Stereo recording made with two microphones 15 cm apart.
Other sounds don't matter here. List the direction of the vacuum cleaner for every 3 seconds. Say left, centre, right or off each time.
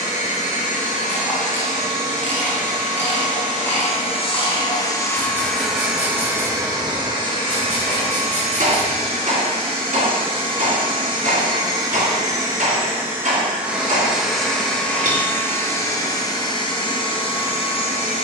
left, left, right, right, centre, left.